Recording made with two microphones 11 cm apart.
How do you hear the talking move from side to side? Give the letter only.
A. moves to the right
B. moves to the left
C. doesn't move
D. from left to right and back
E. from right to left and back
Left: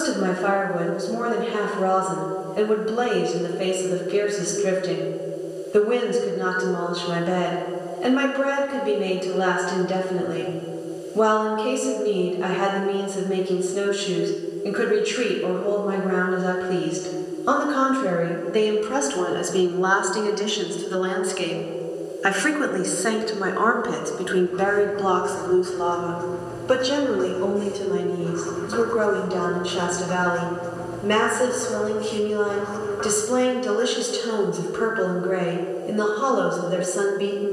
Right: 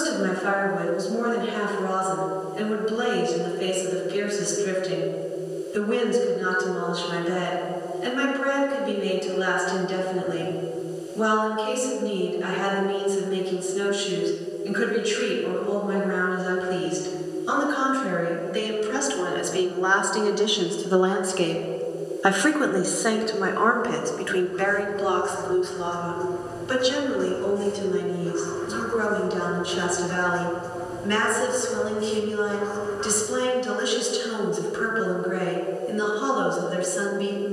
D.